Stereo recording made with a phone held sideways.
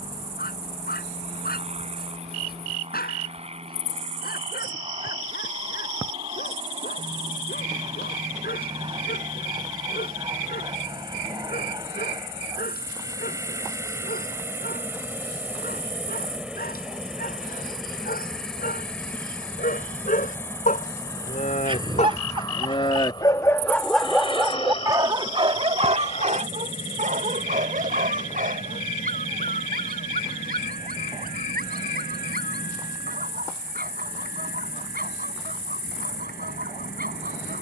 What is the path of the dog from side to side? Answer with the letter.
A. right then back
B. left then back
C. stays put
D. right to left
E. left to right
E.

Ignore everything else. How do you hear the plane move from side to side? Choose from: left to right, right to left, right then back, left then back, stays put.
right to left.